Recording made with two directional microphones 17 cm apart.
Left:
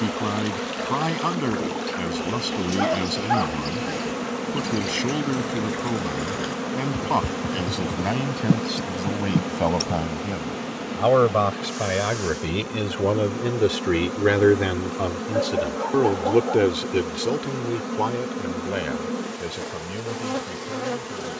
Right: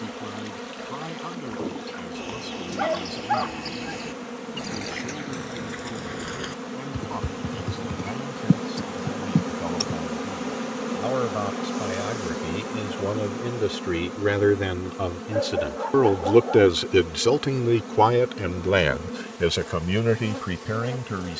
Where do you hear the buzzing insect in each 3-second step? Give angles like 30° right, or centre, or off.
40° left, 40° left, 20° left, 10° right, 10° left, 30° left, 30° left.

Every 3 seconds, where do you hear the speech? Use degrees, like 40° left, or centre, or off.
60° left, 60° left, 60° left, 50° left, 30° left, 20° right, 60° right.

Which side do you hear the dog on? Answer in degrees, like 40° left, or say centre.
10° left.